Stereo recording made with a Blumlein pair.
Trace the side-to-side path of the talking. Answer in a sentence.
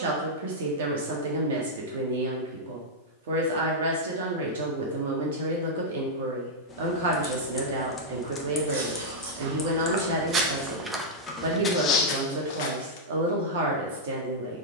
In this clip you hear the talking stay put.